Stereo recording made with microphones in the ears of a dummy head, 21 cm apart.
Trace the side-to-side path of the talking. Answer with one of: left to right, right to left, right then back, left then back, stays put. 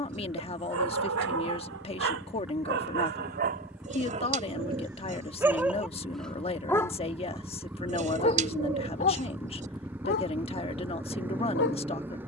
stays put.